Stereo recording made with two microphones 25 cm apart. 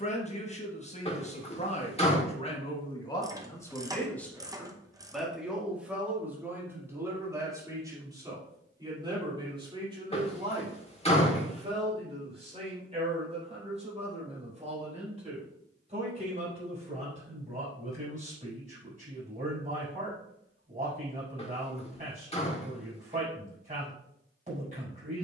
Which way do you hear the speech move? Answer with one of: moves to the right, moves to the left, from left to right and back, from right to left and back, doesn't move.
moves to the right.